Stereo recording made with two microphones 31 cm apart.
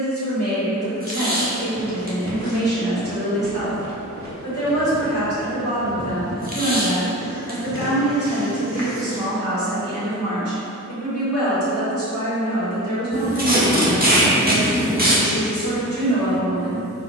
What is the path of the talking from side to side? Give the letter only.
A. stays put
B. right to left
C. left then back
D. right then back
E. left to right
A.